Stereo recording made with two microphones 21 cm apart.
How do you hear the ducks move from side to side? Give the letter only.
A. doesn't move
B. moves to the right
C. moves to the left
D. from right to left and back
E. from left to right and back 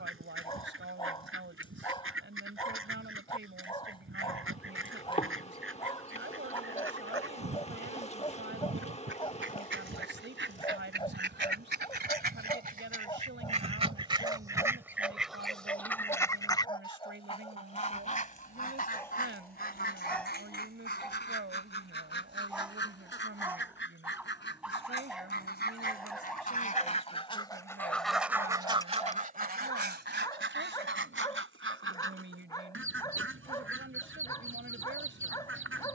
D.